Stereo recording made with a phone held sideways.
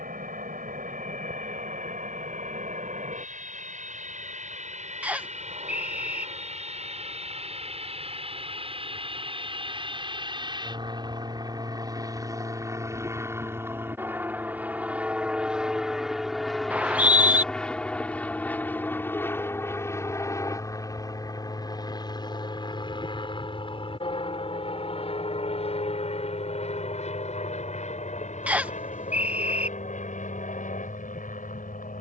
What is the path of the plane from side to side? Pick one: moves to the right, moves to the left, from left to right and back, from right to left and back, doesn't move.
moves to the left.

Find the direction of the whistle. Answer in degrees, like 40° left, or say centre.
10° right.